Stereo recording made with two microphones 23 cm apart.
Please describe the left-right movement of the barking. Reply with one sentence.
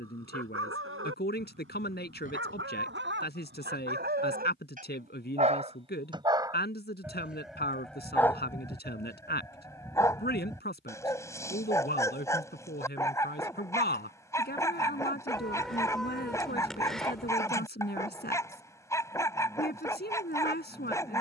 You can hear the barking move to the left.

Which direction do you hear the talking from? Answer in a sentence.
In this clip you hear the talking on the left.